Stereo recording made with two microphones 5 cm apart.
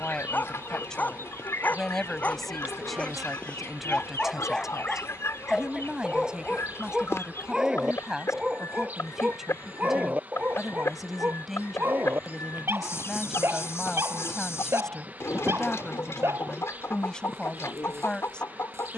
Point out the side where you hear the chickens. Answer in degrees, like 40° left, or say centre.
60° left.